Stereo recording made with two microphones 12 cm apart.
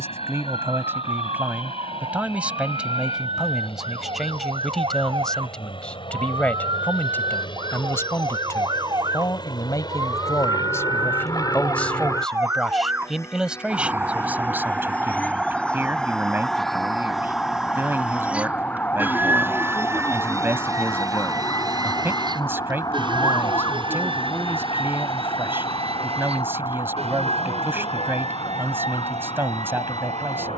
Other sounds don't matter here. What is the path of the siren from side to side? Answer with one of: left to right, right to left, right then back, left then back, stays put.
right to left.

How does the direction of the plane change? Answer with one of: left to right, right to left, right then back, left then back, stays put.
left to right.